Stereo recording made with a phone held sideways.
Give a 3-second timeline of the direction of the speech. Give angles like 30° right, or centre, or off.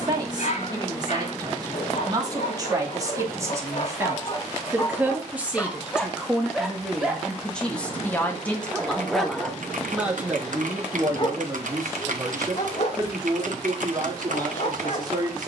30° right, 20° right, 10° left, 10° right, 30° right.